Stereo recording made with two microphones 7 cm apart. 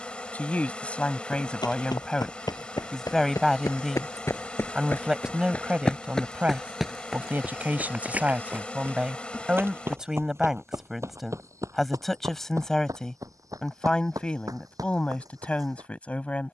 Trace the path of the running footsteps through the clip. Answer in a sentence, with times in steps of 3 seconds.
In this clip you hear the running footsteps on the left from 0 s, in the centre from 6 s and on the right from 9 s.